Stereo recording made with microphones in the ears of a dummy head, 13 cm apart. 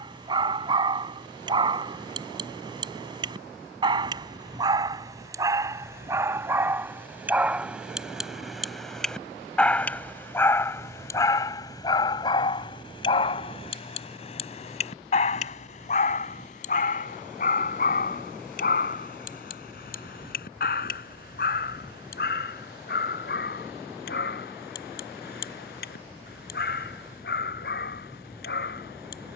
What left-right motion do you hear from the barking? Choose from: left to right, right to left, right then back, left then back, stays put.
right to left.